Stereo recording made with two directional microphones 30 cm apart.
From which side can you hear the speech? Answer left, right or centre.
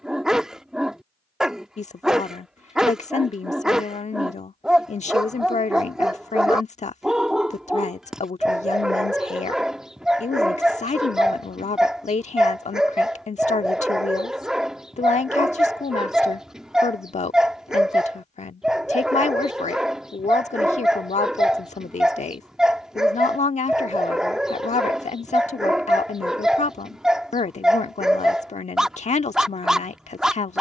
left.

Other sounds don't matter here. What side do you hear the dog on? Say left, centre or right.
centre.